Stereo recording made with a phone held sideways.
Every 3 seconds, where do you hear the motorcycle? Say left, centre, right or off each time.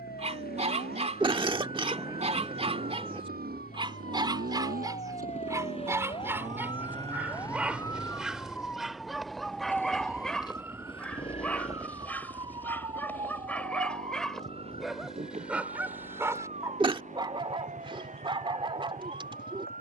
right, right, right, left, left, left, left.